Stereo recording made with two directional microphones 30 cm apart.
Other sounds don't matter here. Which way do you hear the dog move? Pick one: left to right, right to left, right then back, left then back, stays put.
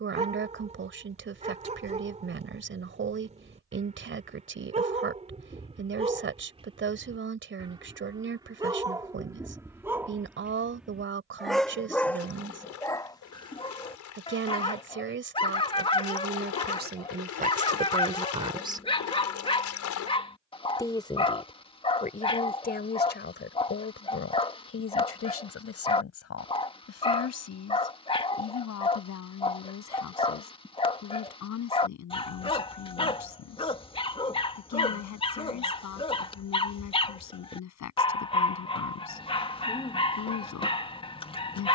right to left.